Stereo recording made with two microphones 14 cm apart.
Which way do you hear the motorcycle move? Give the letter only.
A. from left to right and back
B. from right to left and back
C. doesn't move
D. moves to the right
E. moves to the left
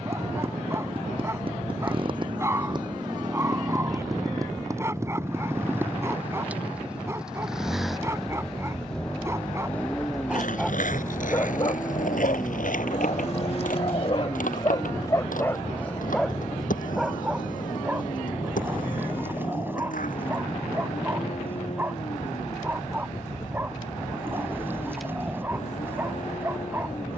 E.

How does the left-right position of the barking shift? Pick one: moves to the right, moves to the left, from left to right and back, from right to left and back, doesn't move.
from right to left and back.